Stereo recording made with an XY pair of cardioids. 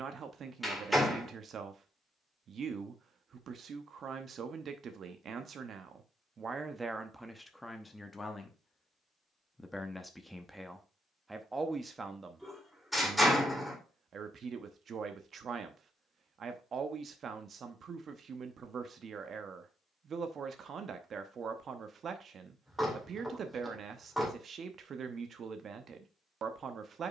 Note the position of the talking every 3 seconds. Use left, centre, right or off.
right, right, centre, centre, right, right, right, right, right.